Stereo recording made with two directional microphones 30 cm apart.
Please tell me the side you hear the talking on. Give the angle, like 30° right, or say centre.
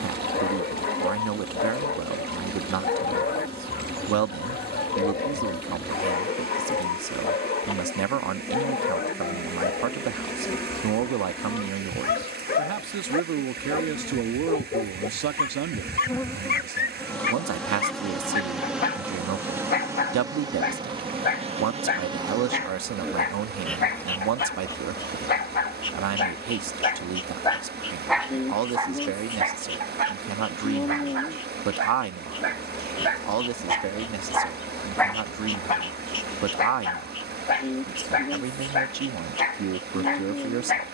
60° right.